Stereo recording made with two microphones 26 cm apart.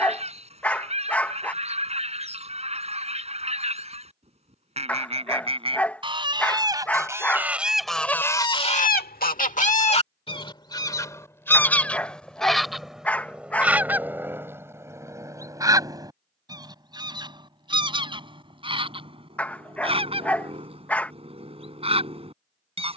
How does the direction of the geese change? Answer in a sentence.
In this clip you hear the geese move from right to left and back again.